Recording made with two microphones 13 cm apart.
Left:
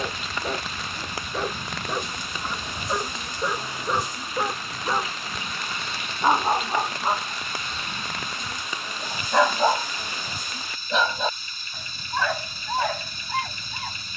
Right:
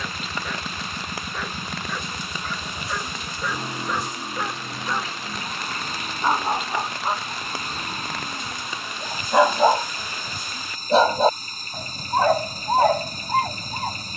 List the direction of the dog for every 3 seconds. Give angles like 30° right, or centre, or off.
30° left, 20° left, 10° left, 30° right, 40° right.